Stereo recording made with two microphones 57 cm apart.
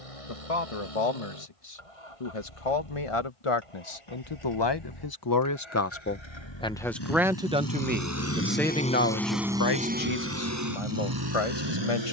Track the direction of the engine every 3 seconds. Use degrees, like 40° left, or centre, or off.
70° left, 60° left, 40° left, 30° right.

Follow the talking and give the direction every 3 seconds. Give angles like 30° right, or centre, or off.
70° left, 50° left, centre, 60° left.